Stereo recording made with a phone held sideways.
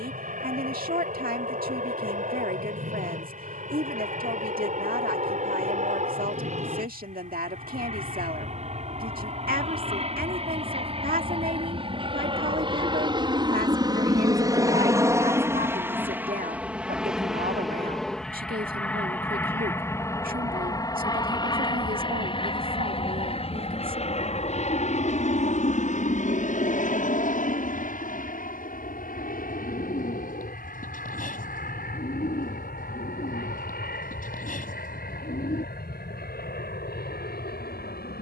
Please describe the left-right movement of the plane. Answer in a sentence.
You can hear the plane move to the left.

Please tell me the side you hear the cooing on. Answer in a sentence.
You can hear the cooing on the left.